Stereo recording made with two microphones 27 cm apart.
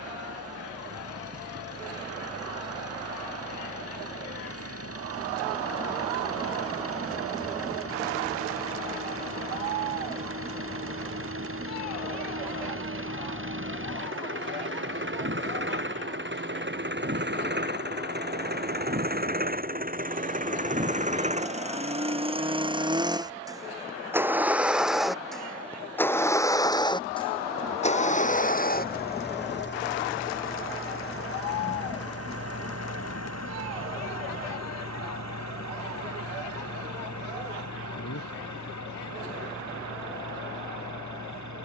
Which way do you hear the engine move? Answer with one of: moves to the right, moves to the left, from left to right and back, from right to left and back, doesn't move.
moves to the left.